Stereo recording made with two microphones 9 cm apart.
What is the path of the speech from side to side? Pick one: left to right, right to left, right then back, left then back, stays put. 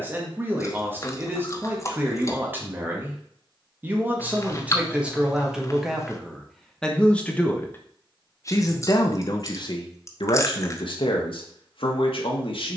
right to left.